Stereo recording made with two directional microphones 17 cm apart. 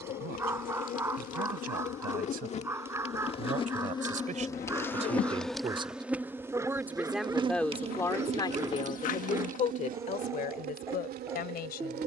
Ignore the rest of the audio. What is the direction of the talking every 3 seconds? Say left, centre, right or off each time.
right, right, centre, left.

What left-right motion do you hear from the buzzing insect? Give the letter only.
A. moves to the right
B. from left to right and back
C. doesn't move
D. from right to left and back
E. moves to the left
A.